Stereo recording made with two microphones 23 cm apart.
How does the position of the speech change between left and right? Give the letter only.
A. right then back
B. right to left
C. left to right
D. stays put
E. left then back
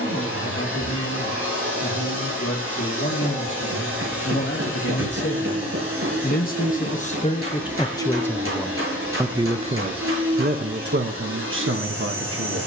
C.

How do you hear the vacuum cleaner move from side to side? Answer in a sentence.
You can hear the vacuum cleaner stay put.